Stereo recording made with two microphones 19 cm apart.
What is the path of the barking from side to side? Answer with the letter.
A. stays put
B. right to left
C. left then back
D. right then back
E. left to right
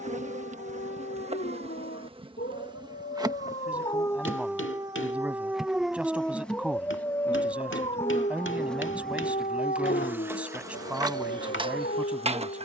D.